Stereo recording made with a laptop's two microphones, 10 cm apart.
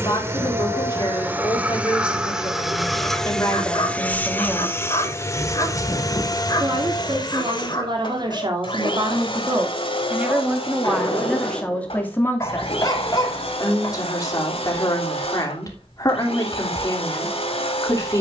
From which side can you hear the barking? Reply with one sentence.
In this clip you hear the barking on the left.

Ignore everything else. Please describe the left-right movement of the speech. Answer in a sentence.
You can hear the speech go right and come back.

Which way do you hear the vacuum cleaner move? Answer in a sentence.
You can hear the vacuum cleaner move to the left.